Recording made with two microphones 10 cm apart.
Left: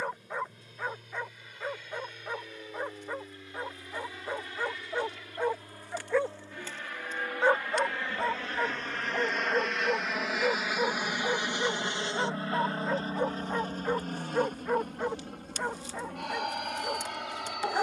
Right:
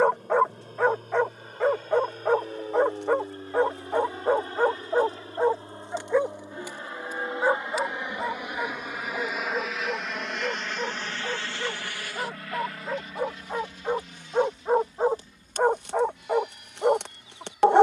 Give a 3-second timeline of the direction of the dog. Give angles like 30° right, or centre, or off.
70° right, 50° right, 10° right, 10° left, 10° right, 60° right.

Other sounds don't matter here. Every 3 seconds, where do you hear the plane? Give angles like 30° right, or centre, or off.
50° right, 40° right, 20° right, 10° left, 40° left, 60° left.